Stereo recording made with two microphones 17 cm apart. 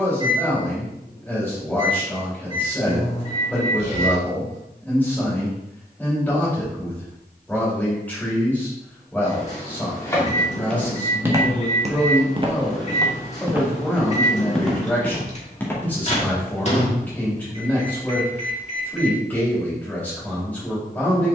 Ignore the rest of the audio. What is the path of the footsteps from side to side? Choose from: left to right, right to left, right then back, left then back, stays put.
right then back.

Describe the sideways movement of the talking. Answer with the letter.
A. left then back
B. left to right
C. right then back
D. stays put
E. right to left
D.